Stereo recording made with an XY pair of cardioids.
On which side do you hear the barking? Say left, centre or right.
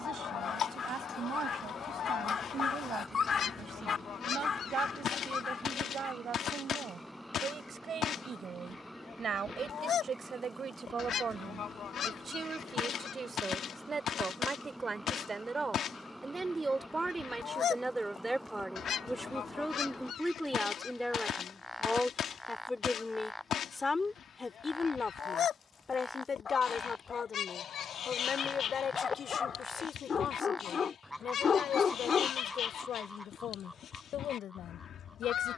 left.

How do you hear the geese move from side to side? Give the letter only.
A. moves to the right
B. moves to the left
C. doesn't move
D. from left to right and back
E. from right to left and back
C.